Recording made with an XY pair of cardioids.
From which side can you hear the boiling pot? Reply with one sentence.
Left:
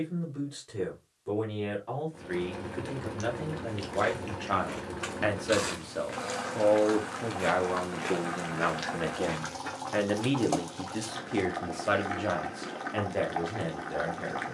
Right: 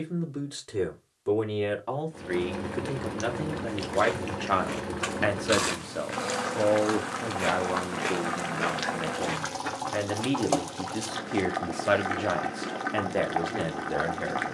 You can hear the boiling pot on the right.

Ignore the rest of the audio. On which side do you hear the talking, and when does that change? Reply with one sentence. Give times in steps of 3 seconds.
In this clip you hear the talking on the right from 0 s, in the centre from 6 s and on the right from 12 s.